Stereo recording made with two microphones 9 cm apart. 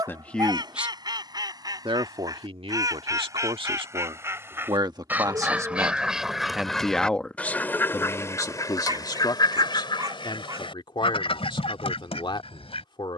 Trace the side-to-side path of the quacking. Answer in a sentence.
You can hear the quacking move to the left.